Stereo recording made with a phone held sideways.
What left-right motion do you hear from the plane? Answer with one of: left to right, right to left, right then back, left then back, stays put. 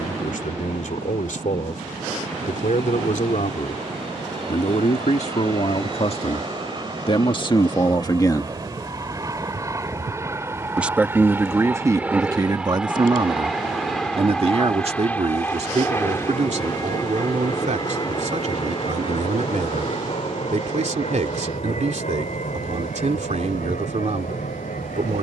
right to left.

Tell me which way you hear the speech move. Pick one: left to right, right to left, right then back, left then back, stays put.
left to right.